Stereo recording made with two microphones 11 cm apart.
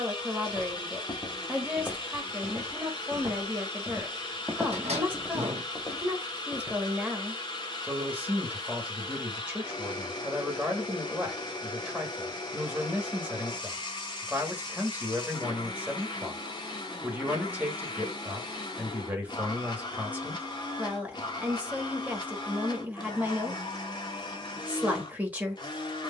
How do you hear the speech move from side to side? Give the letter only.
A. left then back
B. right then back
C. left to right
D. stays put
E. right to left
D.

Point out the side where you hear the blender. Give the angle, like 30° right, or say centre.
40° left.